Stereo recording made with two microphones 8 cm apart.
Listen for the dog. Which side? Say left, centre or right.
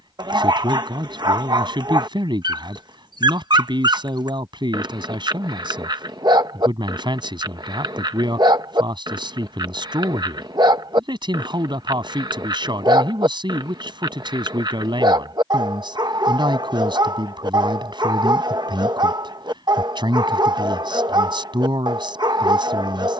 right.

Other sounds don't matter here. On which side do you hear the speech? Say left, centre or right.
right.